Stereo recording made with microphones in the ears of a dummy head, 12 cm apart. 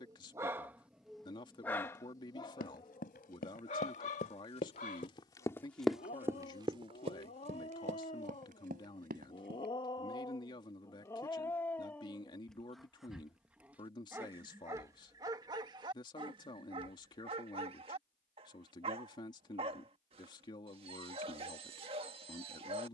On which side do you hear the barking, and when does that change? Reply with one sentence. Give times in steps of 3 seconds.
In this clip you hear the barking in the centre from 0 s, on the left from 3 s, in the centre from 12 s and on the right from 15 s.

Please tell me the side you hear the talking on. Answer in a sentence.
In this clip you hear the talking on the left.